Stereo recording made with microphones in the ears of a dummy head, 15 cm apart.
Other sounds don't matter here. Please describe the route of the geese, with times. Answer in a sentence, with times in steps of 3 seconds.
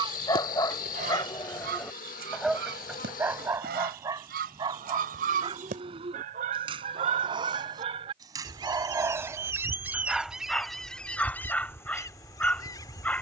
In this clip you hear the geese on the right from 0 s, in the centre from 9 s and on the left from 12 s.